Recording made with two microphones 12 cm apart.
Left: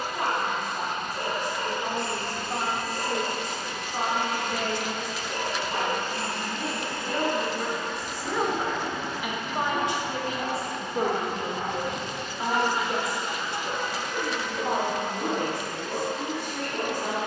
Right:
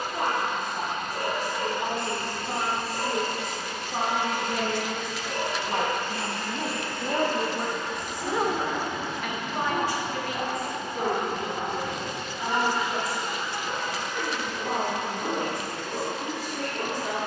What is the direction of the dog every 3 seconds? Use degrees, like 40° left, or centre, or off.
80° right, 70° right, 60° right, 20° right, 20° left, 40° left.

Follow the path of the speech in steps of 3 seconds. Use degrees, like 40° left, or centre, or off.
80° right, 60° right, 30° right, 30° left, 60° left, 70° left.